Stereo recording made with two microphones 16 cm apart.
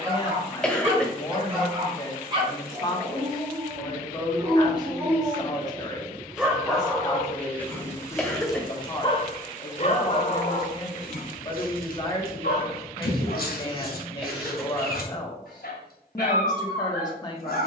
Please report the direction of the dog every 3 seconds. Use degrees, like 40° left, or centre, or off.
30° right, 20° right, 10° left, 50° left, 70° left, 70° left.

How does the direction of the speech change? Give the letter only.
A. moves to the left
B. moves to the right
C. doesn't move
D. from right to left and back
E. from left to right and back
C.